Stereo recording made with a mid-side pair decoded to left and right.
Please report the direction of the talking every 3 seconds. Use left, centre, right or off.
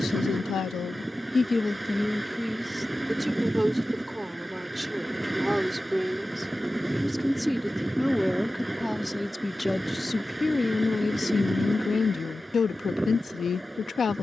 left, centre, centre, left, left.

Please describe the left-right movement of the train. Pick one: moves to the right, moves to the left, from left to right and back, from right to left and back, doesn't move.
doesn't move.